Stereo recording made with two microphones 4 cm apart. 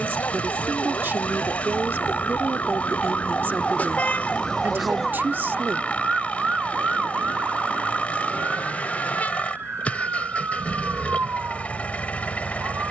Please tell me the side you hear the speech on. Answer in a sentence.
You can hear the speech on the right.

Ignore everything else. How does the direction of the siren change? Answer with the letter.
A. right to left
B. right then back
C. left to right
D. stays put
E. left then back
C.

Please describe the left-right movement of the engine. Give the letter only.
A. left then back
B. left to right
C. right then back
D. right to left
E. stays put
E.